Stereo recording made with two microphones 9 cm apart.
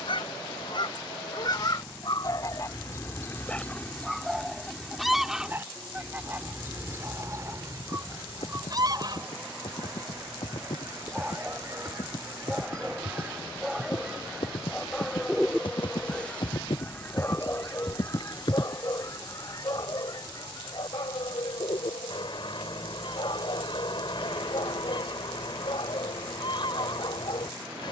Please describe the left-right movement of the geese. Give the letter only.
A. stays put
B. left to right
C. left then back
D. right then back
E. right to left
D.